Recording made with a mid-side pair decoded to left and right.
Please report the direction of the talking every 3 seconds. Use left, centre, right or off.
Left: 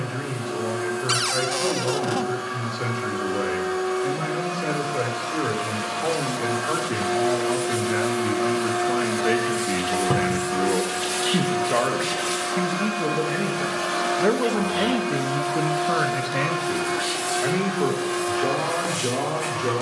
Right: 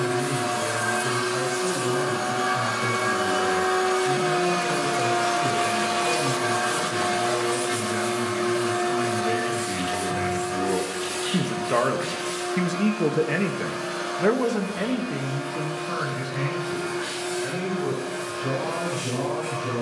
left, left, left, left, centre, left, left.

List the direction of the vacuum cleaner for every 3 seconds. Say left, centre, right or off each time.
right, right, centre, left, left, left, left.